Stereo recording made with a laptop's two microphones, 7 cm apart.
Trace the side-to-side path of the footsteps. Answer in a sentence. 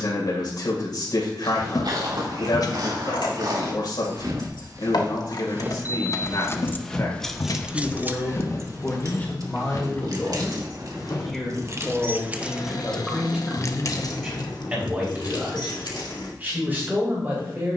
You can hear the footsteps travel towards the left.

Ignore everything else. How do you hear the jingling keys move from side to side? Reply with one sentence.
In this clip you hear the jingling keys move from left to right and back again.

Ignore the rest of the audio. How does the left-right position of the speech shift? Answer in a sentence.
You can hear the speech move to the right.